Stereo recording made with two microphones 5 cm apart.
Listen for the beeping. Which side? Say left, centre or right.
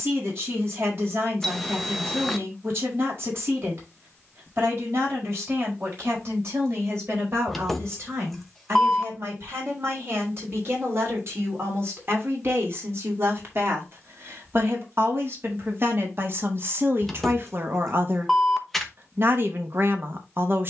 centre.